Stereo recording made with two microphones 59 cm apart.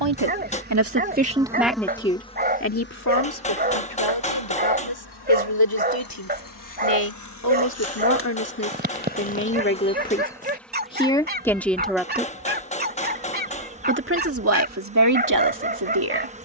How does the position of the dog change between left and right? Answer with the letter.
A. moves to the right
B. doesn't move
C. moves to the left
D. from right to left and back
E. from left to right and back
B.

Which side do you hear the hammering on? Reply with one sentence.
In this clip you hear the hammering in the centre.